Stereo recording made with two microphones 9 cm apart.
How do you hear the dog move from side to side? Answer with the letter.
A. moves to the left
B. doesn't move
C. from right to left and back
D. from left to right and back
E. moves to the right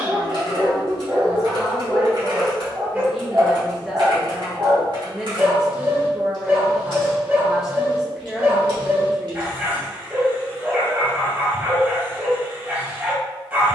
B.